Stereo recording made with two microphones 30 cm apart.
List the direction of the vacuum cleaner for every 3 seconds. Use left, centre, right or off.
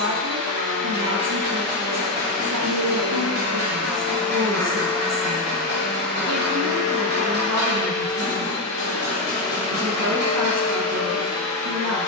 right, centre, left, left.